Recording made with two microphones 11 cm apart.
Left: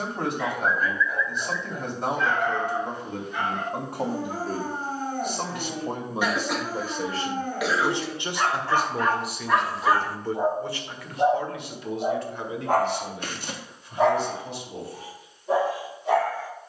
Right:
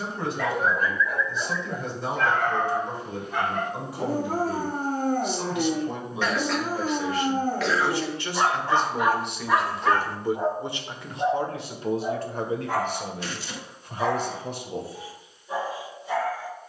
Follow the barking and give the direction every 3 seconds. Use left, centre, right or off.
right, right, right, centre, left, left.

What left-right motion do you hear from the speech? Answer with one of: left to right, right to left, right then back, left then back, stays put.
left to right.